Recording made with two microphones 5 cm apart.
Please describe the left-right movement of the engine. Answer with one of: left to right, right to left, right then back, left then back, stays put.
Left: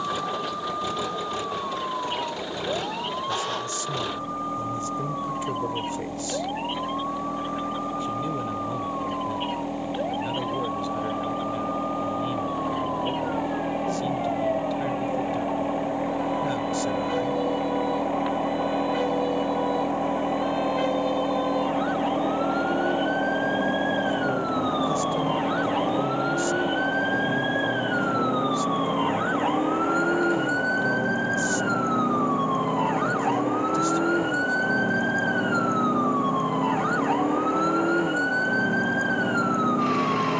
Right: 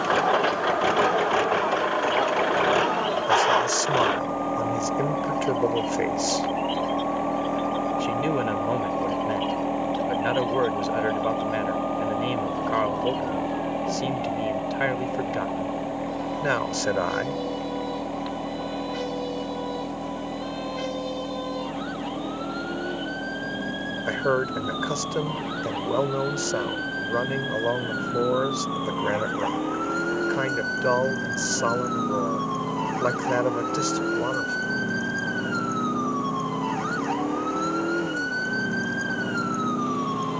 right to left.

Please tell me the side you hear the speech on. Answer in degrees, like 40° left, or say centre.
80° right.